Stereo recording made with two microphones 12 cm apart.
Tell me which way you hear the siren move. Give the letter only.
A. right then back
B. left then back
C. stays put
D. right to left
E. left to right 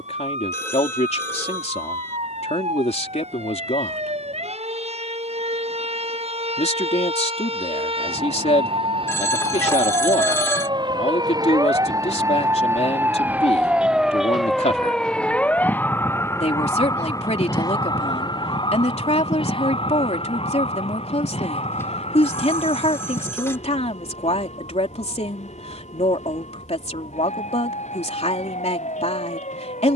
D.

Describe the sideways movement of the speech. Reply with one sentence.
In this clip you hear the speech stay in one place.